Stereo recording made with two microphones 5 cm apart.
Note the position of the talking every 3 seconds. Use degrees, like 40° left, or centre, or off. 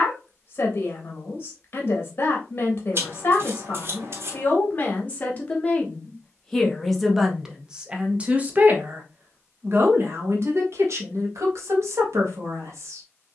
40° left, 30° left, 10° right, 60° right, 60° right.